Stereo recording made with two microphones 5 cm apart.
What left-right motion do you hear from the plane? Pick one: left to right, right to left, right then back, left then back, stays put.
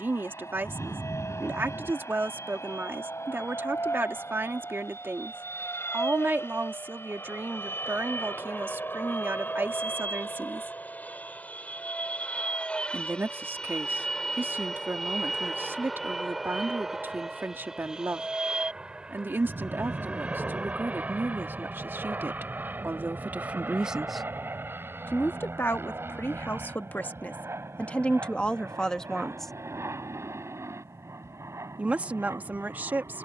left to right.